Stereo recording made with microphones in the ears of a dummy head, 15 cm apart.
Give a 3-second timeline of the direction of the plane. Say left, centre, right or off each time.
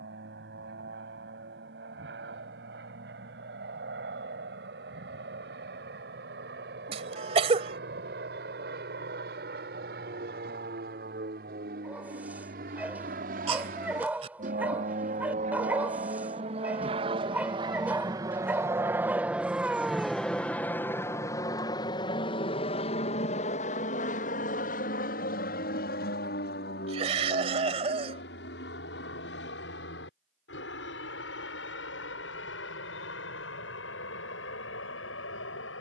right, right, right, right, right, right, centre, left, left, left, left, left.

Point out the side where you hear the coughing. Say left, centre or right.
right.